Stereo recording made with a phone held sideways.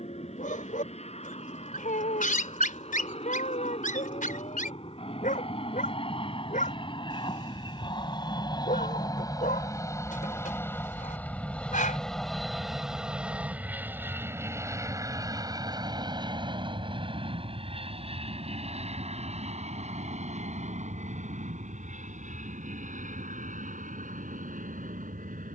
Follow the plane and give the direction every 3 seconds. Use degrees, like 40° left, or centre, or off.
60° left, 50° left, 40° left, 20° left, 10° right, 30° right, 50° right, 60° right, 60° right.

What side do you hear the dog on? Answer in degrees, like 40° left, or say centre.
80° left.